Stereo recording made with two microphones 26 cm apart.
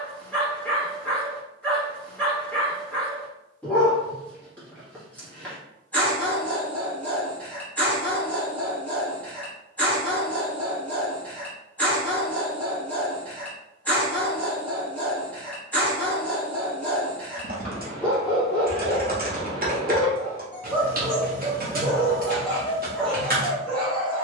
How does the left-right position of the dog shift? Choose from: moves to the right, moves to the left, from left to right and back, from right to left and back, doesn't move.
doesn't move.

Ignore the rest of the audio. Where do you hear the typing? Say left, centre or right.
right.